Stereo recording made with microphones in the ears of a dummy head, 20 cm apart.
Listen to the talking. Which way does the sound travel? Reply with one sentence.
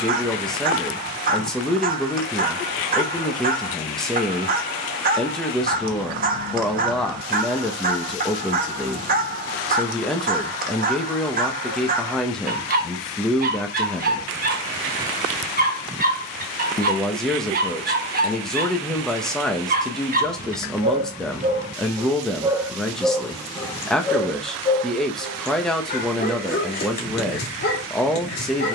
You can hear the talking stay put.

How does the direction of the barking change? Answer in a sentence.
You can hear the barking move to the left.